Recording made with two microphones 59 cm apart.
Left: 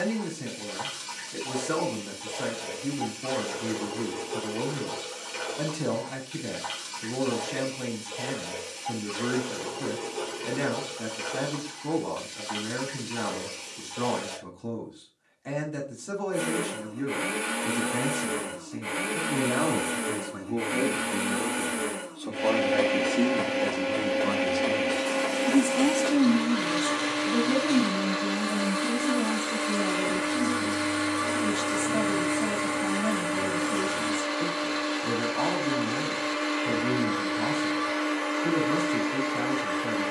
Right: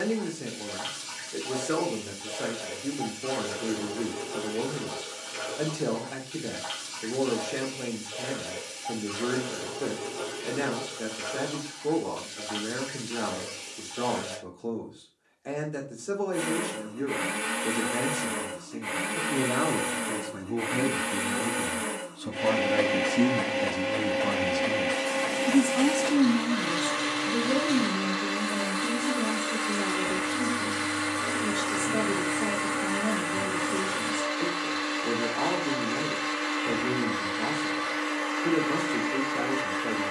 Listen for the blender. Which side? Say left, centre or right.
right.